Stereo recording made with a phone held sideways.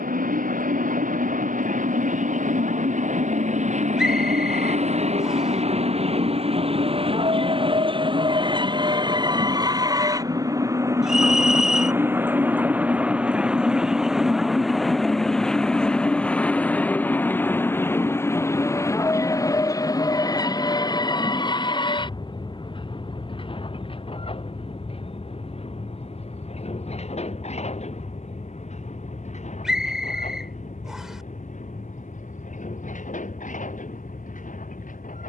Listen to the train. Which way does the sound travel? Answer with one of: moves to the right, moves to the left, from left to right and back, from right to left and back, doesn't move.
moves to the left.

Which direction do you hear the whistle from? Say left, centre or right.
centre.